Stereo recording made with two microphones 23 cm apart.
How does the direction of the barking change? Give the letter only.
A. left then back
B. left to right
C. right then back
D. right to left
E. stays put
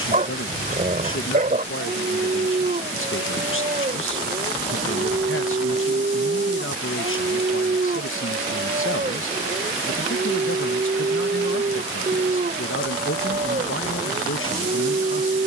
E.